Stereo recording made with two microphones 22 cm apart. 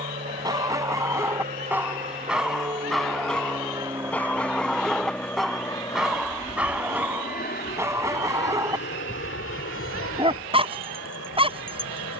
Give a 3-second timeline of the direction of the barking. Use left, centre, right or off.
centre, centre, centre, right.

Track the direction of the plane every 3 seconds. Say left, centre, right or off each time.
right, centre, left, left.